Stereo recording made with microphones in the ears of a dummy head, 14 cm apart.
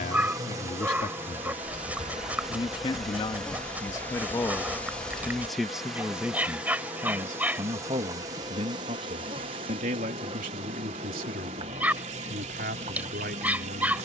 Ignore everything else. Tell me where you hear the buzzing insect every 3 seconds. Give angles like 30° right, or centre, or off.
10° right, 10° left, 20° right, 30° right, 30° right.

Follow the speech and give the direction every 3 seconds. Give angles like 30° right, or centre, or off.
40° left, 10° left, 30° right, 60° right, 70° right.